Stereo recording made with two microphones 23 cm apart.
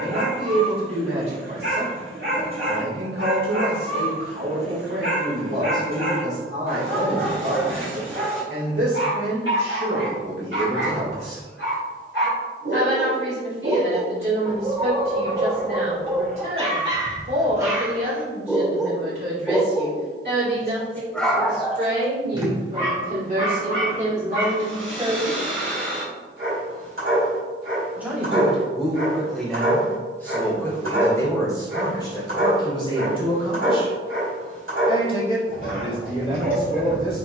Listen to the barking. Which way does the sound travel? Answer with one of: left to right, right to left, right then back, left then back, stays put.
left then back.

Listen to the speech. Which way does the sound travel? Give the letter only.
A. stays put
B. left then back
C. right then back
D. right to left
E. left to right
D.